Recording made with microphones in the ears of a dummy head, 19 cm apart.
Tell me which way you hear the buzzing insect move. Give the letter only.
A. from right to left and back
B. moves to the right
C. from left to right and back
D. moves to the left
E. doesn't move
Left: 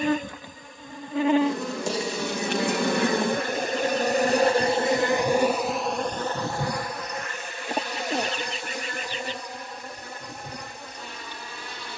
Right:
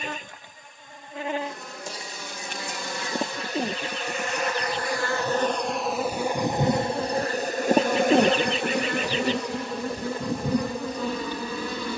B.